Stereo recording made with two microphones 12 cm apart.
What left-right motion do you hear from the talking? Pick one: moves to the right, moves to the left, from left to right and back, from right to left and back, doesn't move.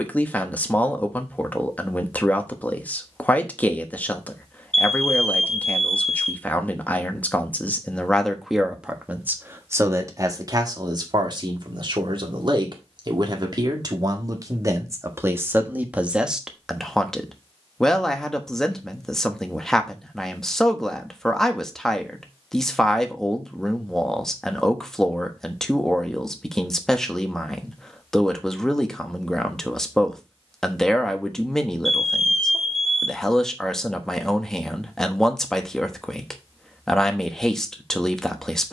from left to right and back.